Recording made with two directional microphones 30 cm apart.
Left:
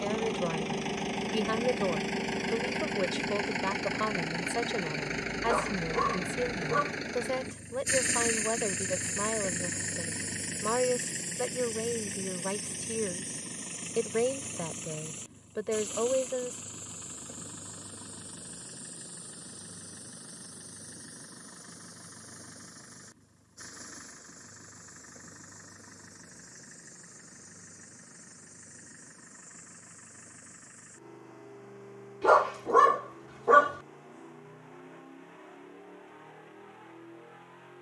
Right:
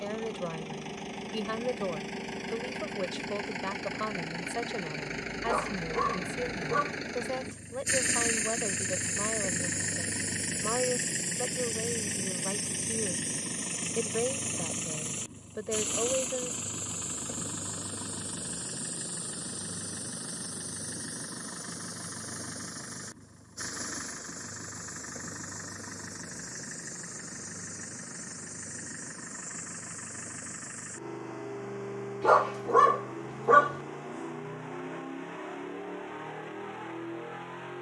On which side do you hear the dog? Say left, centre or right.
centre.